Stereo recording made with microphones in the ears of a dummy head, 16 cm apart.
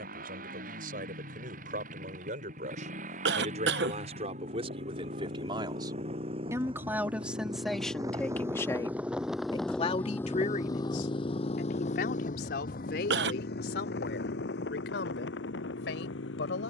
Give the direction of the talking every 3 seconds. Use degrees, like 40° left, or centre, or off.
50° right, 40° right, centre, 40° left, 70° left, 80° left.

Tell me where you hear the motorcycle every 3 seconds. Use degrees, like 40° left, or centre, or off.
50° right, 50° right, 30° right, 20° left, 60° left, 80° left.